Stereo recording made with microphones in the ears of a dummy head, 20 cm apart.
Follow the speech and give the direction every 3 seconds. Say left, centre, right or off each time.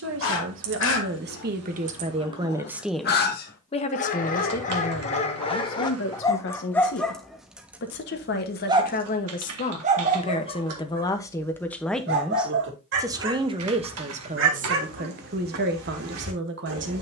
right, left, left, left, right, right.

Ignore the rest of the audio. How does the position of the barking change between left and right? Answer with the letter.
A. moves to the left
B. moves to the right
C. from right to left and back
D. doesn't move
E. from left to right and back
B.